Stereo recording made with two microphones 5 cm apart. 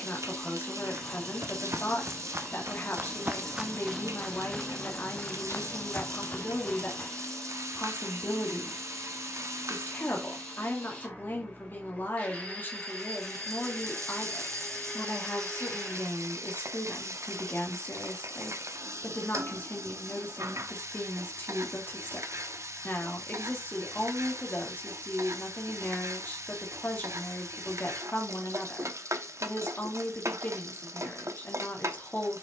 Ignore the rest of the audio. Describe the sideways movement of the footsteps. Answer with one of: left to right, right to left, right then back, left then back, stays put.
right to left.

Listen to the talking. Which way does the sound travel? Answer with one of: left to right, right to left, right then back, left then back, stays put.
stays put.